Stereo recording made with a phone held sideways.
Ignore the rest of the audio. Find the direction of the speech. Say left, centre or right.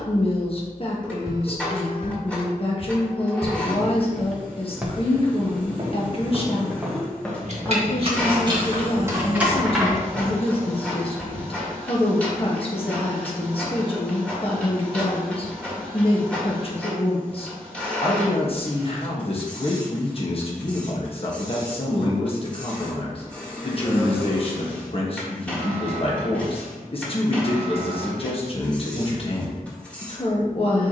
left.